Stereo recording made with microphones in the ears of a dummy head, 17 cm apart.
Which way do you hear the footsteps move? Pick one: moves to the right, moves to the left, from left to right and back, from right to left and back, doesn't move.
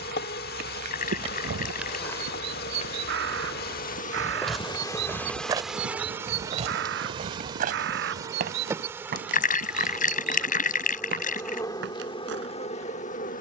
from right to left and back.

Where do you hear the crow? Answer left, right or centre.
right.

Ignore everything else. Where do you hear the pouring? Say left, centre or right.
left.